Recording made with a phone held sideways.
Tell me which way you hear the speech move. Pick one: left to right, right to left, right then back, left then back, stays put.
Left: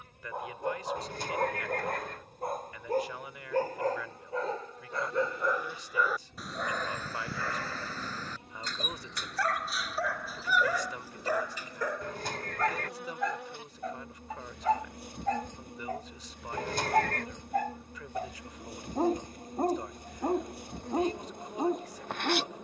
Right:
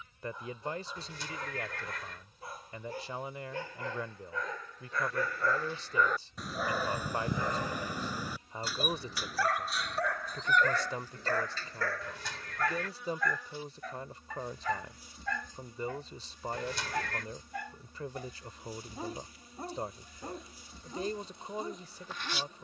stays put.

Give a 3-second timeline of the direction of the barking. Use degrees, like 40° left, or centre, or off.
60° left, 30° left, 10° right, 10° left, 30° left, 50° left, 60° left, 60° left.